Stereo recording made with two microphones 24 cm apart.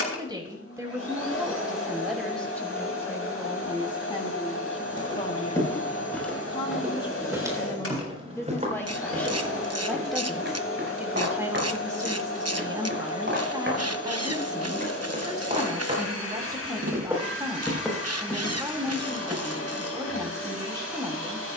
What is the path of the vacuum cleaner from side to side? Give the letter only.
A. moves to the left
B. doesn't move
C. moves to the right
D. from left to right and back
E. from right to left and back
B.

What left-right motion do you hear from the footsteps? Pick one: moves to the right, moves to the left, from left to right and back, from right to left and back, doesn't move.
from left to right and back.